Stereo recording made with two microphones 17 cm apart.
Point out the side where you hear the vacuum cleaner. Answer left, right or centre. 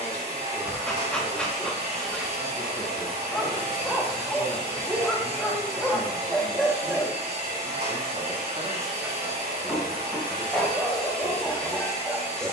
right.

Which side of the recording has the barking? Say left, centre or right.
centre.